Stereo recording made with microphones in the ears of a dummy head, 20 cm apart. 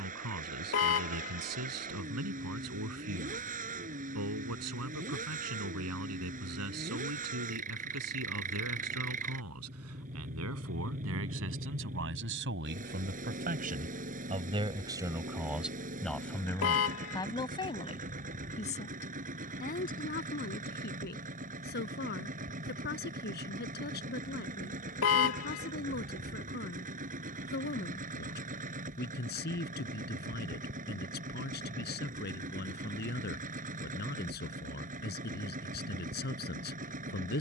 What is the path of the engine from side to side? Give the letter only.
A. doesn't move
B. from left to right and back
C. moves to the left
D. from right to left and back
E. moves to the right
A.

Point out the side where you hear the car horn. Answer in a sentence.
You can hear the car horn on the left.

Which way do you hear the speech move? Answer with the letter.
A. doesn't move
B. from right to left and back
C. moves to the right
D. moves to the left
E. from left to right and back
D.